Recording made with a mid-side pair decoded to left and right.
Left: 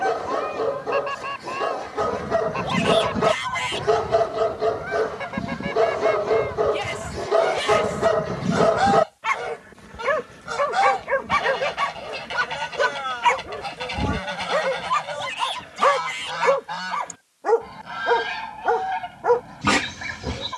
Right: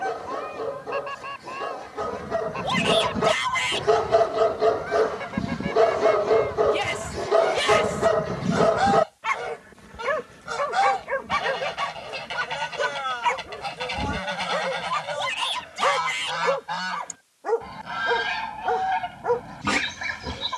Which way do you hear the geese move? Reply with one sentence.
You can hear the geese move from left to right.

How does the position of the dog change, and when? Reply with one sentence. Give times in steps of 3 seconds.
In this clip you hear the dog on the left from 0 s, in the centre from 3 s and on the left from 9 s.